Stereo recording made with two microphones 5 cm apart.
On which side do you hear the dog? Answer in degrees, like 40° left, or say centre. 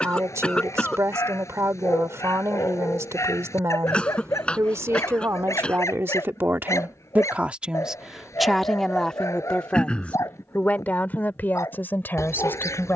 80° left.